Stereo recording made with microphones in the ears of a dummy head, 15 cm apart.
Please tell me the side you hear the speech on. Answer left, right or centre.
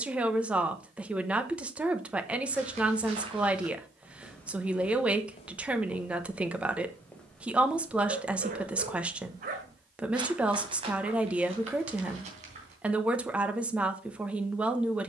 centre.